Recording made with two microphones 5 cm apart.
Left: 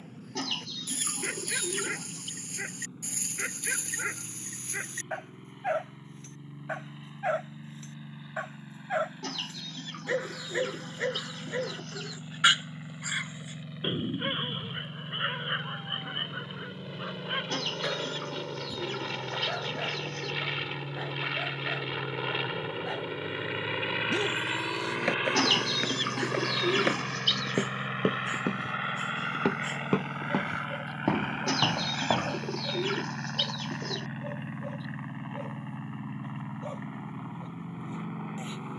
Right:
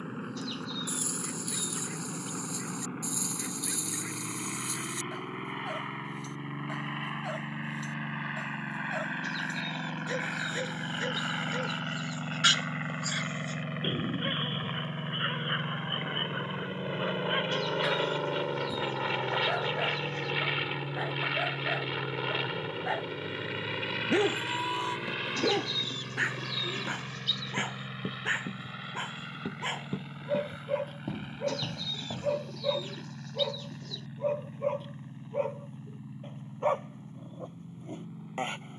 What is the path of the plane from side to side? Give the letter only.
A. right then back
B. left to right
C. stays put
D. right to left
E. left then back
D.